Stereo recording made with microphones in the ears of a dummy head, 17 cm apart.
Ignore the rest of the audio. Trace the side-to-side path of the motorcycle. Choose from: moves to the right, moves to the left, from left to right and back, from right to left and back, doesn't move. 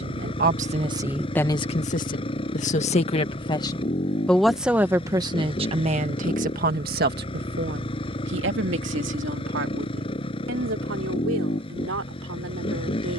doesn't move.